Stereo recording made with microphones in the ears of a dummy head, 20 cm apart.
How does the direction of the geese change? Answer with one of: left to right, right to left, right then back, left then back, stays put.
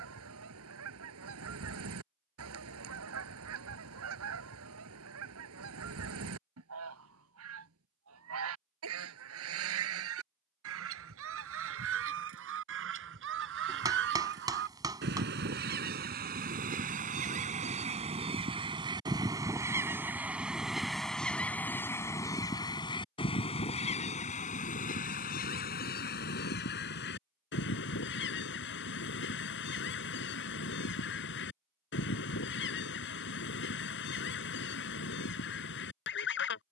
right to left.